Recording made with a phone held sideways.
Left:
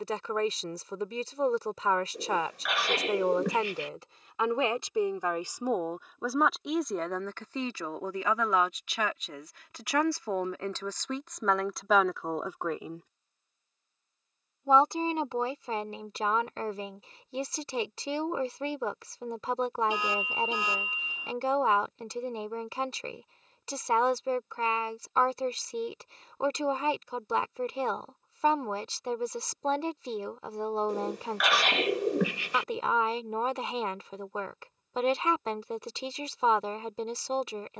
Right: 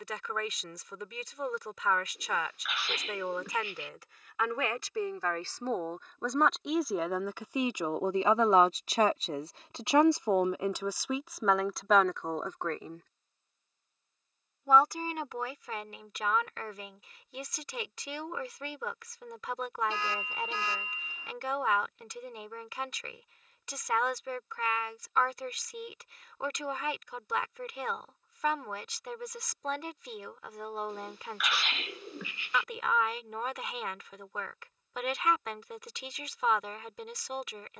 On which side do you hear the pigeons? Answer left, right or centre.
left.